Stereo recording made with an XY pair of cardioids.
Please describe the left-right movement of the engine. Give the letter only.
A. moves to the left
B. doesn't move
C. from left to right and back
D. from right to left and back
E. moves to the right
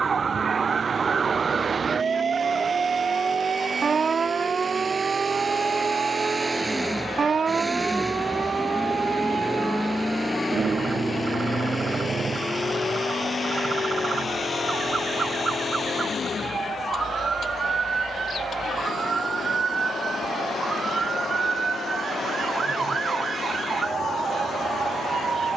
A.